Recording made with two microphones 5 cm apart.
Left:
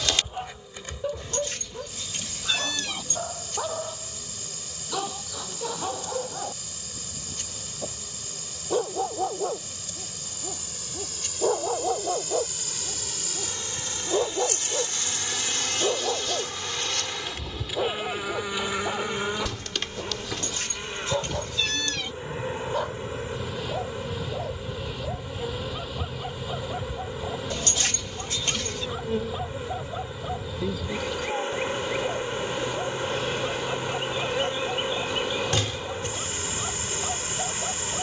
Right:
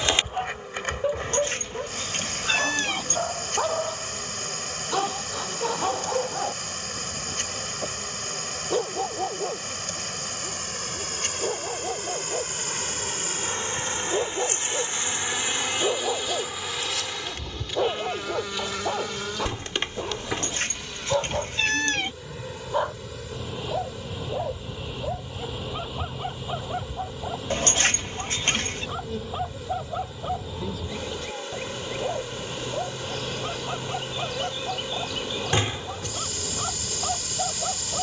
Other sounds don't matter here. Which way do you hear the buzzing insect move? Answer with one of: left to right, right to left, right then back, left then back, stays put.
right to left.